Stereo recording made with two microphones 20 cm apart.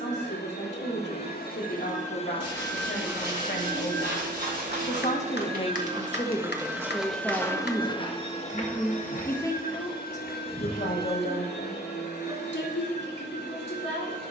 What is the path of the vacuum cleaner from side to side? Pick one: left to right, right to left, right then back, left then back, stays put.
right then back.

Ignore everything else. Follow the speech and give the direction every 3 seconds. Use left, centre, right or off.
left, left, centre, left, left.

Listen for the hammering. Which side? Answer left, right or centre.
left.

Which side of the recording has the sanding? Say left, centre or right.
left.